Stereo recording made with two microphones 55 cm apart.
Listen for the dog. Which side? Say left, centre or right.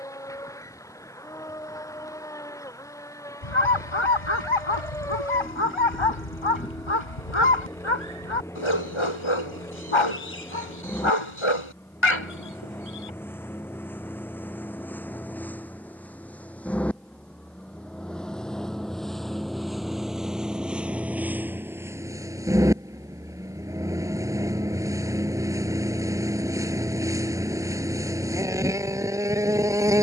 left.